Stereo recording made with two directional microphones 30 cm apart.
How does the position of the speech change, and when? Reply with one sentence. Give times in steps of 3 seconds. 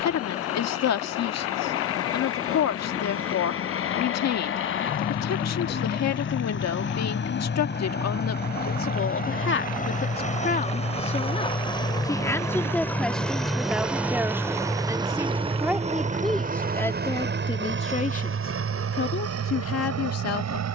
In this clip you hear the speech on the left from 0 s, in the centre from 12 s and on the left from 18 s.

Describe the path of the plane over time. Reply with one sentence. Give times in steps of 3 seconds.
You can hear the plane on the left from 0 s, in the centre from 12 s and on the right from 15 s.